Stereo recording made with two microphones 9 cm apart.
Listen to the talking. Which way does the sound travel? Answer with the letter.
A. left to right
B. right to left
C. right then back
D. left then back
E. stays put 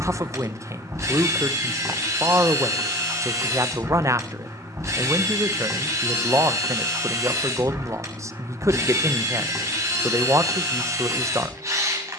E.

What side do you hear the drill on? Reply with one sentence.
In this clip you hear the drill on the right.